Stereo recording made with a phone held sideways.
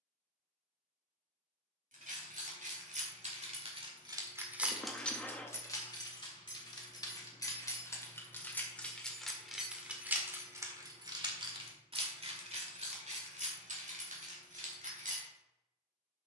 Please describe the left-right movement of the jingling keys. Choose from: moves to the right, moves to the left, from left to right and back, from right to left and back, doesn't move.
from right to left and back.